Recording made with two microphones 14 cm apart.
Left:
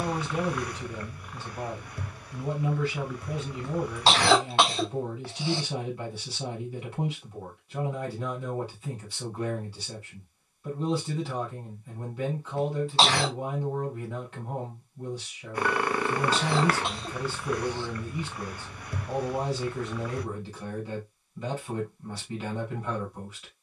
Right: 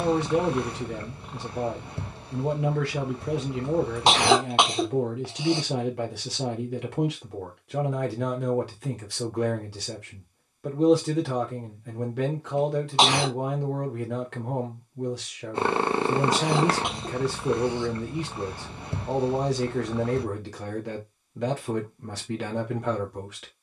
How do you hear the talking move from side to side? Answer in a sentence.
In this clip you hear the talking stay in one place.